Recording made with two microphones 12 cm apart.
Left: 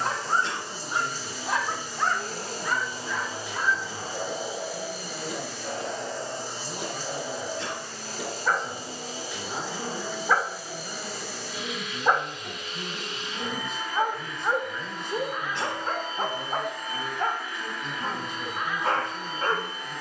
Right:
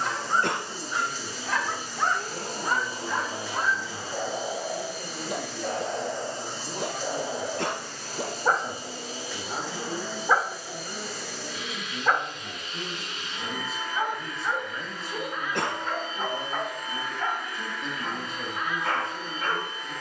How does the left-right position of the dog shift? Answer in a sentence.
You can hear the dog move from left to right and back again.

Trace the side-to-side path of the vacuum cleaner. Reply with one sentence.
In this clip you hear the vacuum cleaner stay put.